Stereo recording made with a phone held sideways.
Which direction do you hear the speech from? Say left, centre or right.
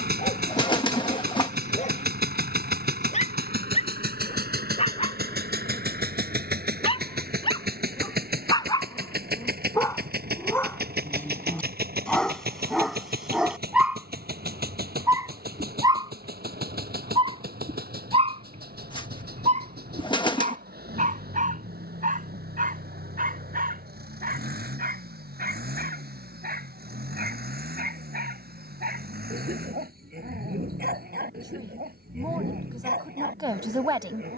right.